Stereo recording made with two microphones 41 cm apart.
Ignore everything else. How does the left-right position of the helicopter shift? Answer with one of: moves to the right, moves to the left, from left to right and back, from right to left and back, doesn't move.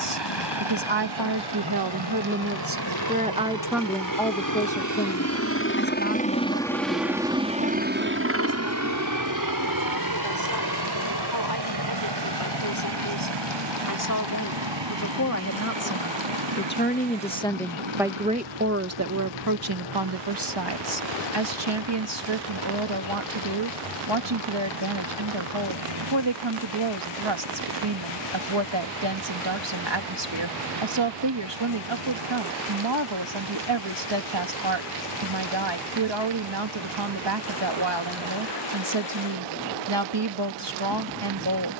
moves to the right.